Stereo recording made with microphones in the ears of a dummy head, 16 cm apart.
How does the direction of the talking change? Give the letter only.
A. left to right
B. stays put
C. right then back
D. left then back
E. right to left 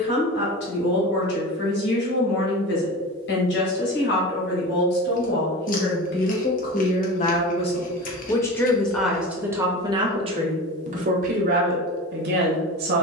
A.